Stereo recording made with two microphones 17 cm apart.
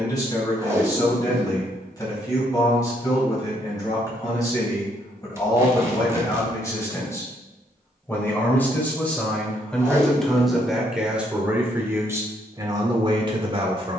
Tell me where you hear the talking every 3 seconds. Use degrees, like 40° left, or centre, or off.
20° left, 20° left, 20° left, centre, 30° right.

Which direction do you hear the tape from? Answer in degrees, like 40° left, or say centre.
20° right.